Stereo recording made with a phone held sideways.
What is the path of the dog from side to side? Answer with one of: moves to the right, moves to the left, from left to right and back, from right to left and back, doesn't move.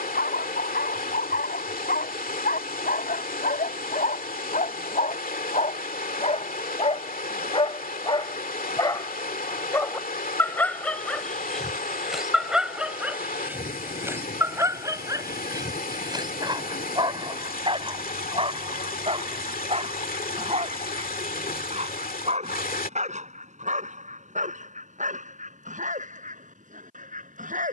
moves to the right.